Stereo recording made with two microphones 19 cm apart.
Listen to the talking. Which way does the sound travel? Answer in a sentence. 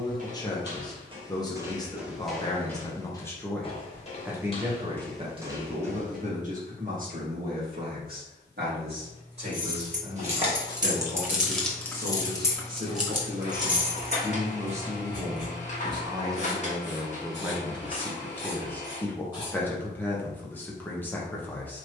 In this clip you hear the talking go right and come back.